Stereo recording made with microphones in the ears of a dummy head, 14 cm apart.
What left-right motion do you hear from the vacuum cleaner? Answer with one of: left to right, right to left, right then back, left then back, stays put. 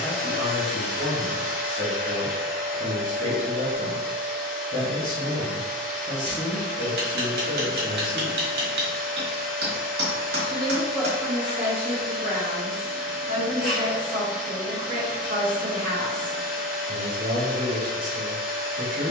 stays put.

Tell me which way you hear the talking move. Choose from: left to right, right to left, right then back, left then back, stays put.
left to right.